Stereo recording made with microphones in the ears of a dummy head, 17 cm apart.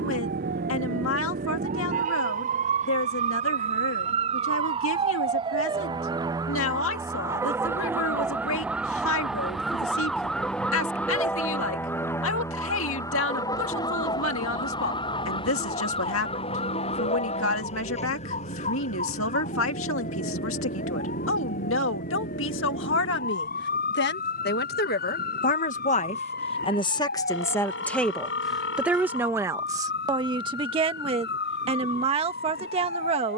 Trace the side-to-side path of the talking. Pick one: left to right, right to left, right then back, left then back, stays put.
left to right.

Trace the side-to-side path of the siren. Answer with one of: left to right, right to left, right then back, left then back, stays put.
right to left.